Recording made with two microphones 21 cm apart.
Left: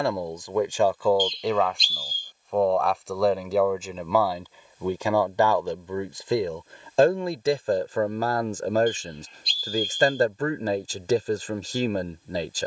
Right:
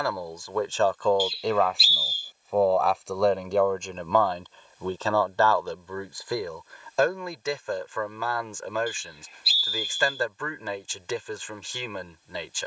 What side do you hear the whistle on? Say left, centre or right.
centre.